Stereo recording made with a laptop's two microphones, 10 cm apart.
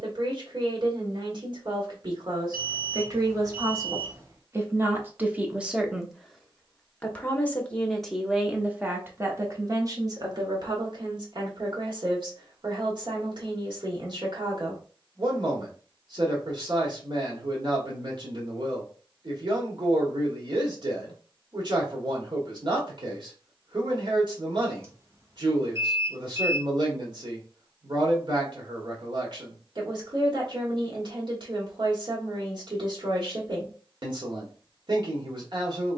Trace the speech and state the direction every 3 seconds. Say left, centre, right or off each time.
right, right, centre, right, right, right, right, right, right, right, right, right.